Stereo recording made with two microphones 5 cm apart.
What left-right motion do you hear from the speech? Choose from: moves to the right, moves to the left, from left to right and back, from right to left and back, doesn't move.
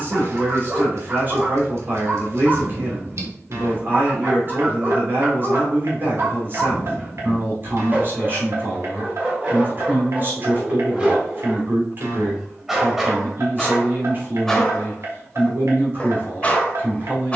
doesn't move.